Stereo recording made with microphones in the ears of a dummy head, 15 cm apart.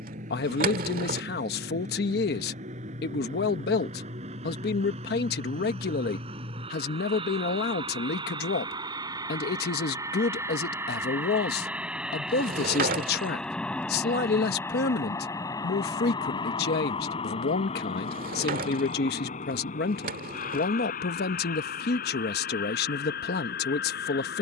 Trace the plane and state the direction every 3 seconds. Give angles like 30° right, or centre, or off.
50° right, 50° right, 40° right, 20° right, centre, 30° left, 50° left, 60° left.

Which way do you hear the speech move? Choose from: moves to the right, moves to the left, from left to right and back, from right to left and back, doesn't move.
doesn't move.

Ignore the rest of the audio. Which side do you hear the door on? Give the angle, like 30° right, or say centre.
60° right.